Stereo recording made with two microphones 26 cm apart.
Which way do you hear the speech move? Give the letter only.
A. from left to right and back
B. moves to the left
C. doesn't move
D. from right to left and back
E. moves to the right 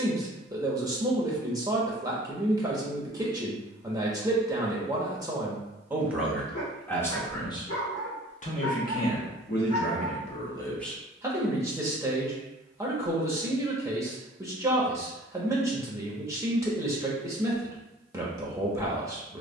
D.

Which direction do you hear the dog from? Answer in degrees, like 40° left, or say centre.
70° left.